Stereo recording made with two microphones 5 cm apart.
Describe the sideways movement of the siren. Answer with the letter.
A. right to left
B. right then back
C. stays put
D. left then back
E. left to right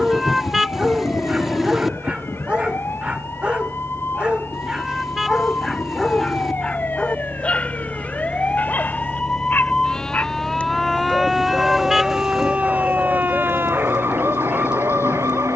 E.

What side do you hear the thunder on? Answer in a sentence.
In this clip you hear the thunder on the left.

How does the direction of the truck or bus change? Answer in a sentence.
In this clip you hear the truck or bus travel towards the left.